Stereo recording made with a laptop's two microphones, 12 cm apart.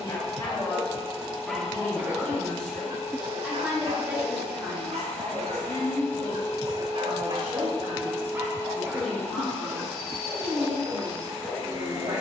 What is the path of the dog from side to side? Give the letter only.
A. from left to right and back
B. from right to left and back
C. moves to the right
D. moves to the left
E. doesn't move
A.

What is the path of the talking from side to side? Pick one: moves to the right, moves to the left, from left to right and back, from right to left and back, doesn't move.
moves to the right.